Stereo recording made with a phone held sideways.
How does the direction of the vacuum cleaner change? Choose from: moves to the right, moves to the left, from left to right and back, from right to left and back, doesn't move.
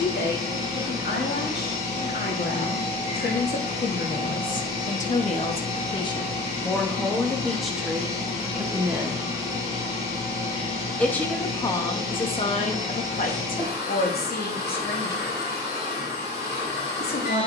doesn't move.